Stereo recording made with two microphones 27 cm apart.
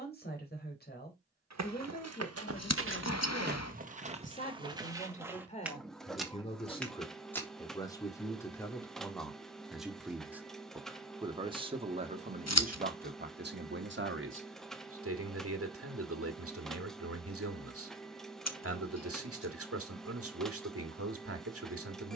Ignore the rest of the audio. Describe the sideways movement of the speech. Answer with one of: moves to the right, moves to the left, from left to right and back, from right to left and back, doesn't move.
moves to the right.